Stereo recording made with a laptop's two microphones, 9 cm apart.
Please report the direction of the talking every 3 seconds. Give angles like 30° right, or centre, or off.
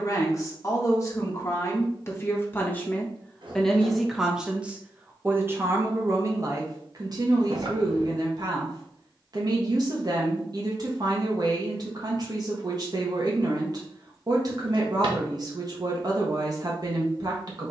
30° left, 10° right, 50° right, 50° right, 50° right, 50° right.